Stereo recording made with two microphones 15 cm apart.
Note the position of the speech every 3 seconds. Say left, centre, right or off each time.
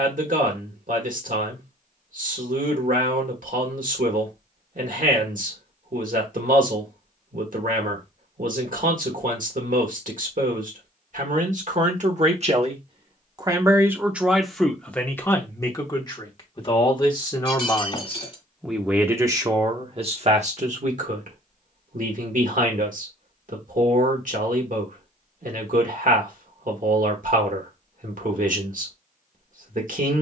right, right, right, right, right, left, right, right, right, right.